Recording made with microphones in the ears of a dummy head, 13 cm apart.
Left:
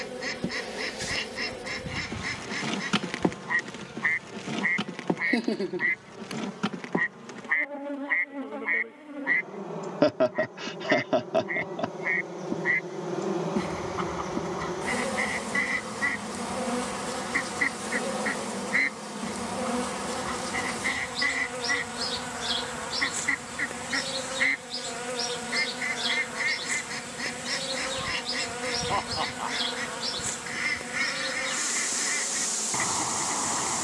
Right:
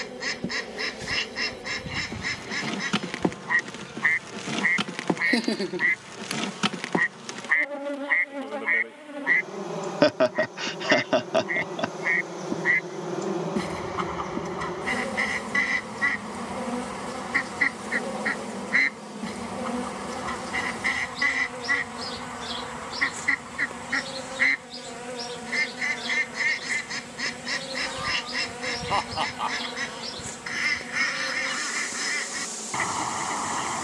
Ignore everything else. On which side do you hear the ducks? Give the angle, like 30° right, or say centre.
20° right.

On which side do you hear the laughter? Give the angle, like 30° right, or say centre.
40° right.